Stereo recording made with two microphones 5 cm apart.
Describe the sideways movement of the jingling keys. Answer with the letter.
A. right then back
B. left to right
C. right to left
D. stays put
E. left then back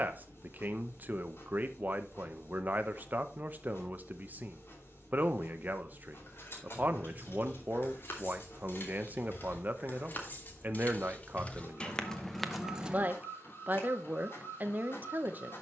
B.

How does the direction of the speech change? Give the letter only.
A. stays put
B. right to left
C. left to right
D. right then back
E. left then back
A.